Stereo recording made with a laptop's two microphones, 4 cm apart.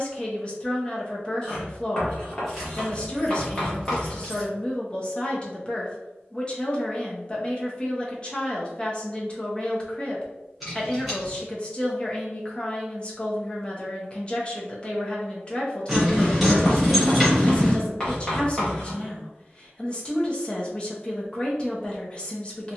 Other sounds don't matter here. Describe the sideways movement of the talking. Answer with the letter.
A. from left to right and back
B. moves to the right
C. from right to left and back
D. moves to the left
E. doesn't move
E.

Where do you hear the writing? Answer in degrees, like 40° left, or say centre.
20° left.